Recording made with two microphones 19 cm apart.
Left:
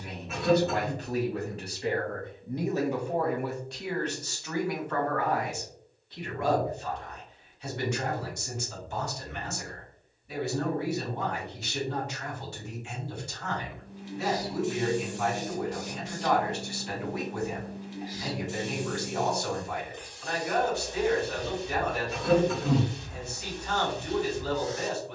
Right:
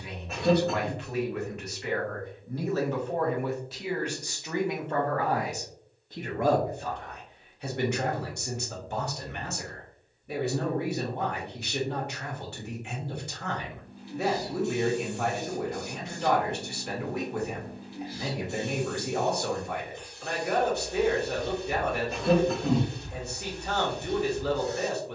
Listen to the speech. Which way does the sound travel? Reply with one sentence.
You can hear the speech travel towards the right.